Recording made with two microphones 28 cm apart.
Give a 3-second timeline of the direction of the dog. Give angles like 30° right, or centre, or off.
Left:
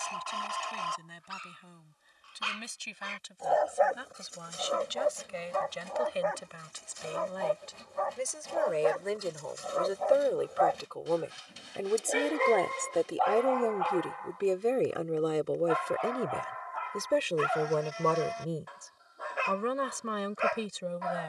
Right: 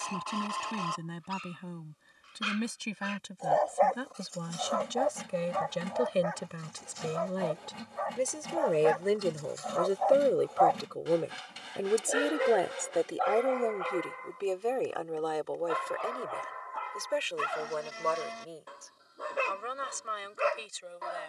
30° right, 20° left, 50° left, 20° left, 20° right, 40° right, 40° right.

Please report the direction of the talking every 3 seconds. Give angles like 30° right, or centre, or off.
60° right, 60° right, 50° right, 30° right, 10° left, 40° left, 60° left.